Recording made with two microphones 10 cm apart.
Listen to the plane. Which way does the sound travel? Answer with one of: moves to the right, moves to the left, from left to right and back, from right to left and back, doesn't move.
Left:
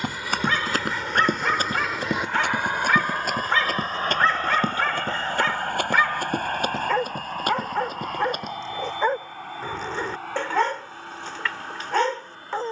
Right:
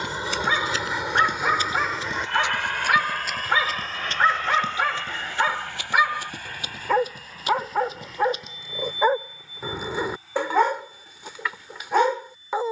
moves to the left.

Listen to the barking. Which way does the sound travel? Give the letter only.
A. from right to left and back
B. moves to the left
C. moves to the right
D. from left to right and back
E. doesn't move
E.